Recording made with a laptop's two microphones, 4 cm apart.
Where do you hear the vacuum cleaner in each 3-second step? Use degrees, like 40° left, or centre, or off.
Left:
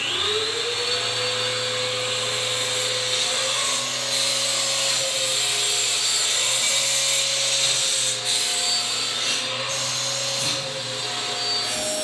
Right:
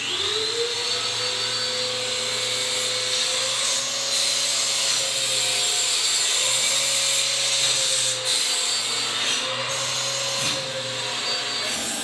30° left, 10° left, 20° right, 40° right.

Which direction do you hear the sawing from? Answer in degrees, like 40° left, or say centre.
centre.